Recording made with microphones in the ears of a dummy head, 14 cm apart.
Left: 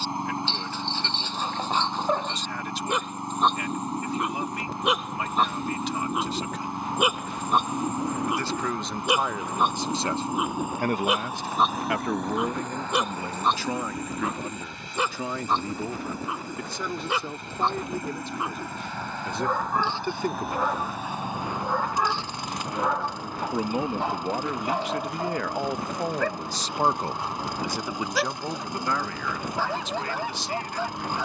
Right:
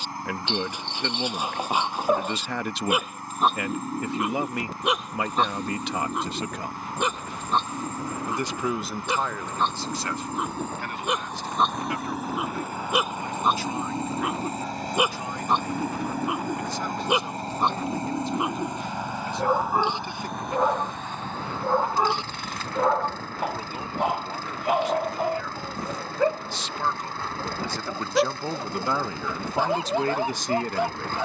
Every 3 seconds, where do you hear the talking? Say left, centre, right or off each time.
right, right, right, left, left, left, left, left, left, centre, right.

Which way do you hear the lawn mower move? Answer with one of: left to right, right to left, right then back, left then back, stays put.
right then back.